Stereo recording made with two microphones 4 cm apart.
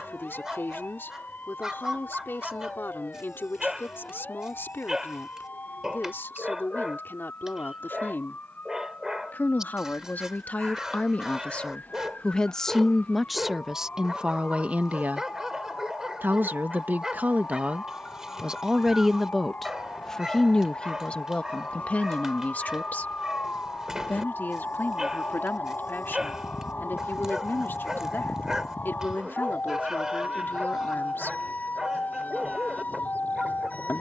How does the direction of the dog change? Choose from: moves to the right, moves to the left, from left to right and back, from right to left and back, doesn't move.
doesn't move.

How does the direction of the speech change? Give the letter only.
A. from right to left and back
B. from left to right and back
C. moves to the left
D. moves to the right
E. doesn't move
B.